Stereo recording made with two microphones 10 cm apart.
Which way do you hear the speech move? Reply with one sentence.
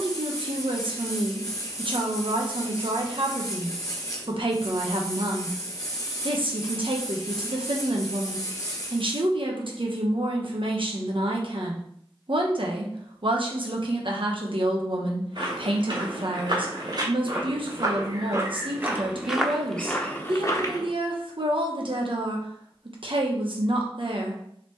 In this clip you hear the speech stay put.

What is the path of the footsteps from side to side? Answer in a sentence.
You can hear the footsteps travel towards the left.